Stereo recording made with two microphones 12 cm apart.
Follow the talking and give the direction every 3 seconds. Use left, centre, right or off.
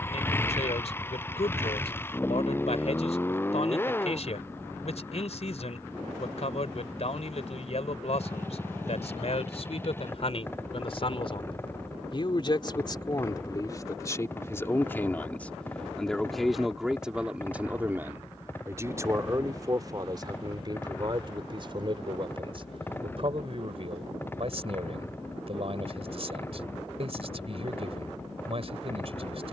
left, left, left, left, left, centre, right, right, right, right.